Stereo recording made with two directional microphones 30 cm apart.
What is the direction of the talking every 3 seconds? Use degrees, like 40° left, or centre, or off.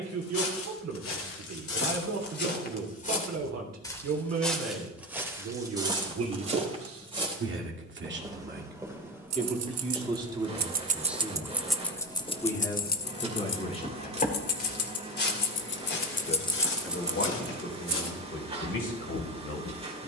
60° right, 60° right, 40° right, 10° right, 20° left, 40° left, 40° left.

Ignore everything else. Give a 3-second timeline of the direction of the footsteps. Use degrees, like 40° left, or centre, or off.
50° left, centre, 20° right, centre, 20° left, 40° left, 60° left.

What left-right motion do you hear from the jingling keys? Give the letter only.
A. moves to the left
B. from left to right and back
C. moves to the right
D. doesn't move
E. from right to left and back
E.